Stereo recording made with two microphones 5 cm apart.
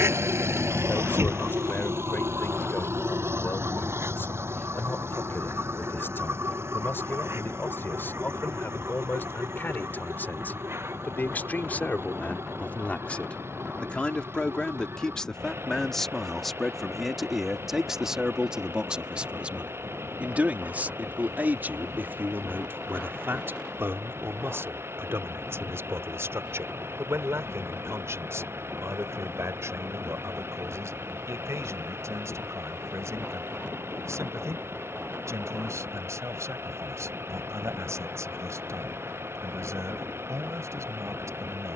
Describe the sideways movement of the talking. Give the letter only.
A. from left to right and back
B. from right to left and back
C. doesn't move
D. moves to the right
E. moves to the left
D.